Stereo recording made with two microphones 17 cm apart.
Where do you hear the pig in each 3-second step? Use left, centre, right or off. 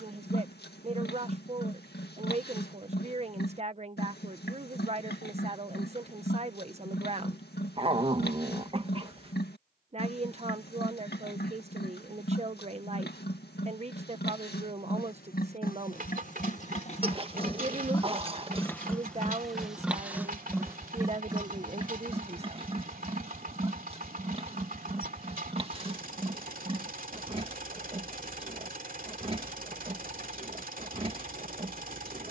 left, left, left, left, left, left, centre, right, right, right, right.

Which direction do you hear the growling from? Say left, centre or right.
right.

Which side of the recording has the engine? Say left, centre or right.
right.